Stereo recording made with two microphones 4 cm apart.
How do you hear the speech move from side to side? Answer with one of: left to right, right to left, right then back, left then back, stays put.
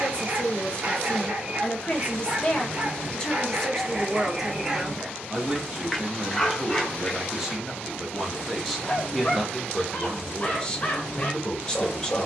right then back.